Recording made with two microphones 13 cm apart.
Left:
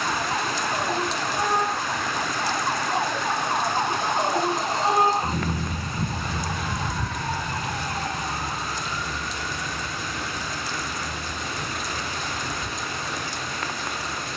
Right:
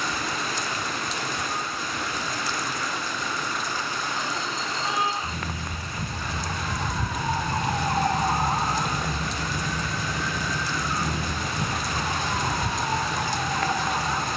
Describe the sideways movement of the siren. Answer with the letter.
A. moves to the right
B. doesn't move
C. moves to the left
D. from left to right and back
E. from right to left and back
A.